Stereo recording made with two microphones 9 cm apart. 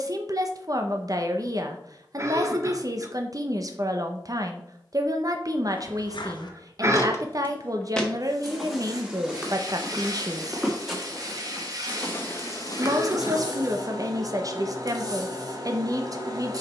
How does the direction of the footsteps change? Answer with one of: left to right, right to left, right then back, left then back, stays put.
right then back.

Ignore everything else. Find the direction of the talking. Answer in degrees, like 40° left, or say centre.
40° right.